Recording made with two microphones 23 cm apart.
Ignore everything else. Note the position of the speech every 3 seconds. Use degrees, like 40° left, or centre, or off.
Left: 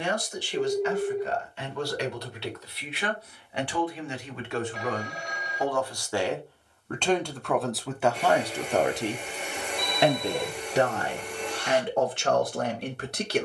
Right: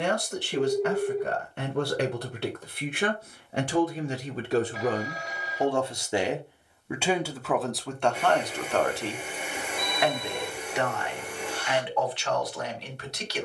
50° right, 40° right, centre, 30° left, 50° left.